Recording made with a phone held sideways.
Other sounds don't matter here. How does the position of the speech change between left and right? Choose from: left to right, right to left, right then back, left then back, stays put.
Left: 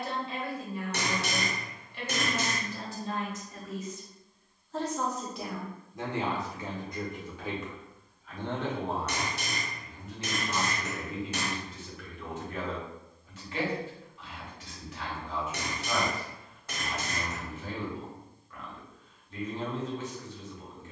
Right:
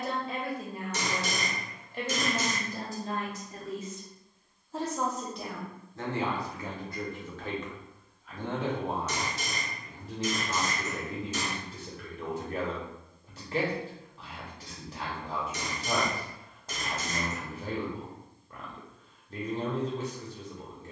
left then back.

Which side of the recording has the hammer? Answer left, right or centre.
left.